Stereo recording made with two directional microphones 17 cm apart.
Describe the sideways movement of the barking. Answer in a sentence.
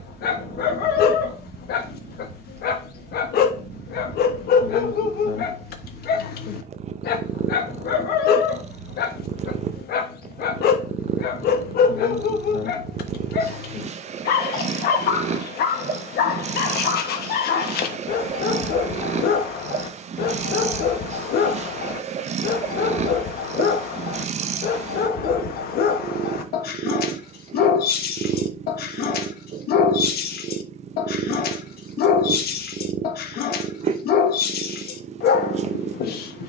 In this clip you hear the barking stay put.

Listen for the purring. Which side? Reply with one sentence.
In this clip you hear the purring on the right.